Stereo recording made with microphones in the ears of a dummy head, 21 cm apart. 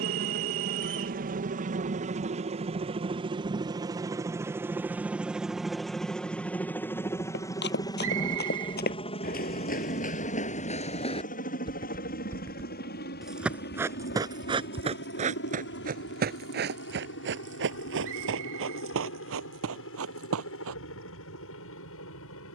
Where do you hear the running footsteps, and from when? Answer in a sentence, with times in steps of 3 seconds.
You can hear the running footsteps not at all from 0 s, on the left from 6 s, in the centre from 12 s, on the right from 15 s and not at all from 21 s.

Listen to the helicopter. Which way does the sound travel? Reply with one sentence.
In this clip you hear the helicopter move to the left.